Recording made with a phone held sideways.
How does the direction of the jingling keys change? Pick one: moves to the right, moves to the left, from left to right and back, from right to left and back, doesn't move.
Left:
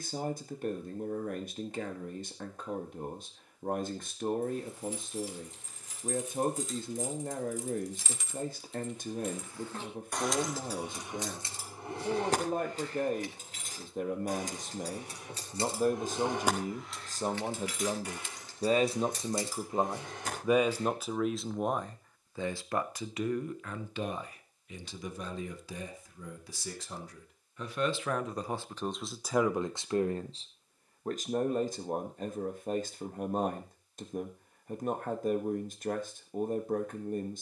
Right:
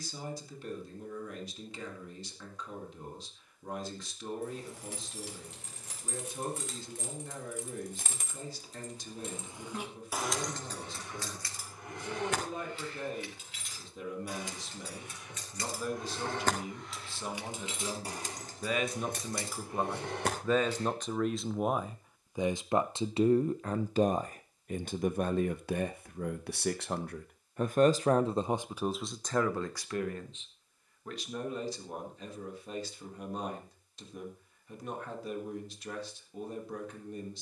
from right to left and back.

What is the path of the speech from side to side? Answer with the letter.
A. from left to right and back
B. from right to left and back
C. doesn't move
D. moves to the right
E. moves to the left
A.